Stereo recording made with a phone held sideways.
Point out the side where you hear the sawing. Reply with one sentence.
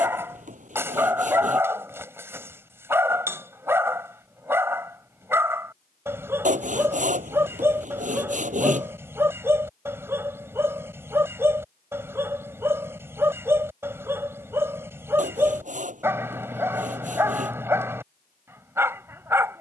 You can hear the sawing on the right.